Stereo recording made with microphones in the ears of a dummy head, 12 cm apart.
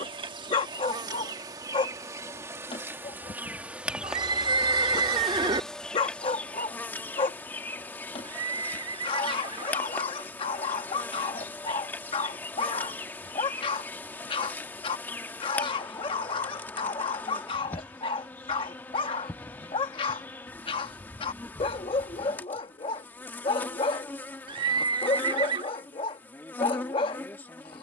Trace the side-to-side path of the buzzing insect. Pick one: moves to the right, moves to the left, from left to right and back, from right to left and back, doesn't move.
moves to the left.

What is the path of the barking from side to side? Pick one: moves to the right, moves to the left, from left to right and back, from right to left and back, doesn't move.
doesn't move.